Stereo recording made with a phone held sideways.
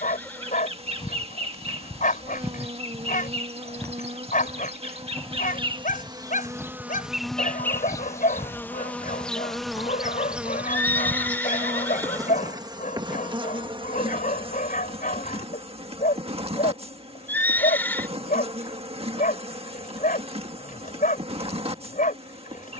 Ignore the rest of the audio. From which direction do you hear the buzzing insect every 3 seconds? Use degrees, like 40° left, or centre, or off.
40° right, 40° right, centre, 10° right, 30° right, 40° right, 40° right, 40° right.